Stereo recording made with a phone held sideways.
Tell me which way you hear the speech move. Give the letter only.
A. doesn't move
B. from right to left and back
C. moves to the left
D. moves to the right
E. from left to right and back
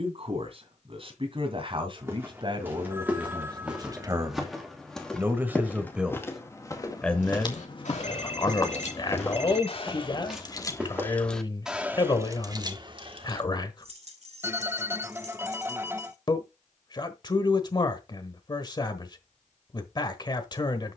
C.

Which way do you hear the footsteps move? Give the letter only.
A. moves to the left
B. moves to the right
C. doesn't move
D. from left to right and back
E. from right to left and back
E.